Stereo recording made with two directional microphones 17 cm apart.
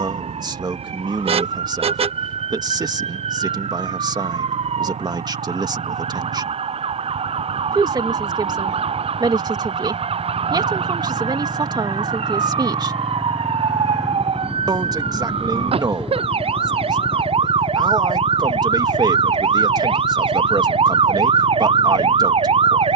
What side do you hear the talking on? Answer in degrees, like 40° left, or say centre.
20° right.